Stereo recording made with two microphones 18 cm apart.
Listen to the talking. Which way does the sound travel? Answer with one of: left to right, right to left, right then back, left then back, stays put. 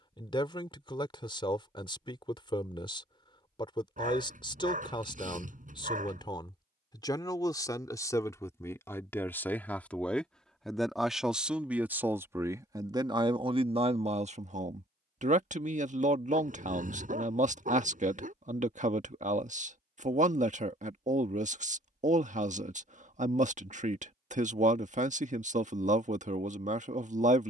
left to right.